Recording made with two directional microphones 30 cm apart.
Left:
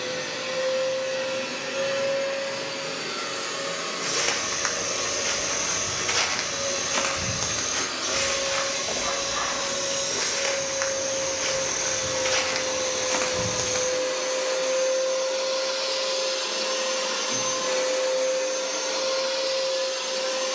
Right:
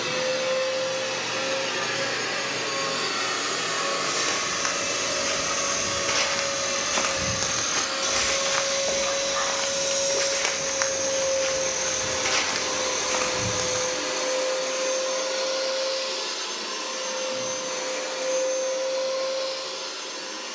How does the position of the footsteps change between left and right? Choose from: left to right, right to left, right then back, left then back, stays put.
right then back.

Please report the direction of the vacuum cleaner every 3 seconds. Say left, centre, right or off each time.
right, right, right, right, centre, left, left.